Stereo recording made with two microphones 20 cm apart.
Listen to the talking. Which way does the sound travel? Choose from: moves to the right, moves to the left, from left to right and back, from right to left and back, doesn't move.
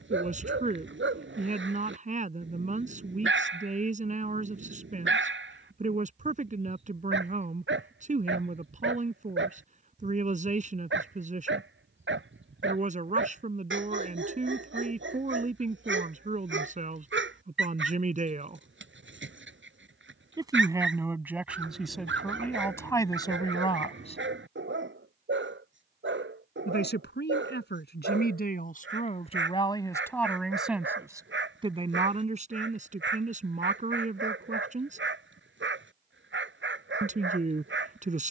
from right to left and back.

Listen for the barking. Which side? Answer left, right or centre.
right.